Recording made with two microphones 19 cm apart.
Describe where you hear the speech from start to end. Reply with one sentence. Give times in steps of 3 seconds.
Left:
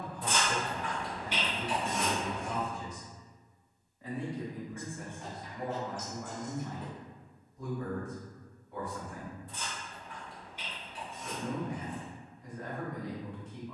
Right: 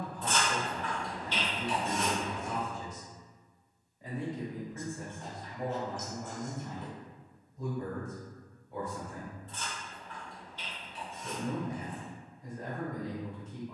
In this clip you hear the speech in the centre from 0 s and on the right from 3 s.